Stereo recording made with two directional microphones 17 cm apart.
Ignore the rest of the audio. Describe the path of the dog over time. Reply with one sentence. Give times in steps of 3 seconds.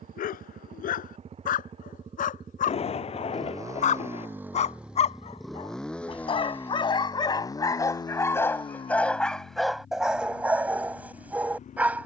You can hear the dog on the left from 0 s and in the centre from 9 s.